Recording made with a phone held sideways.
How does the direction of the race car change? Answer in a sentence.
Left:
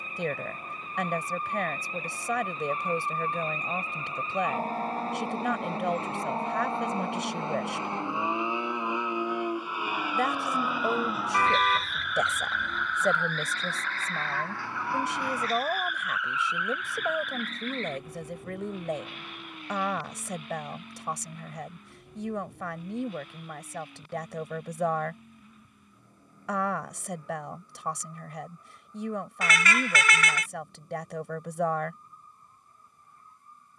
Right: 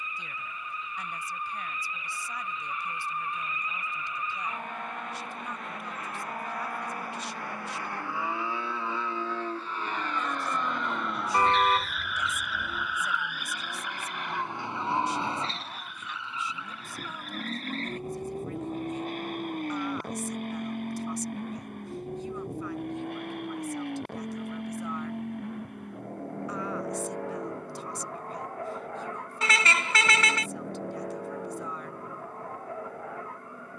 In this clip you hear the race car go from the left side to the right.